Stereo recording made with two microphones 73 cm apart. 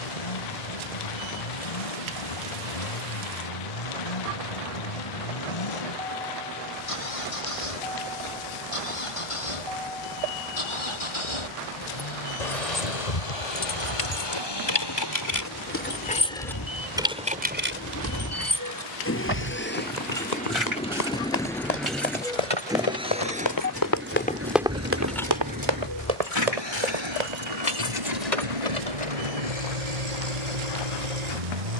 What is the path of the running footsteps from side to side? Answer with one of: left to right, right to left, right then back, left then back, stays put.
left to right.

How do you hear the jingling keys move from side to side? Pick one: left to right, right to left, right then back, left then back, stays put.
right then back.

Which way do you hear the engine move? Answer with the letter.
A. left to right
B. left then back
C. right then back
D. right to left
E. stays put
A.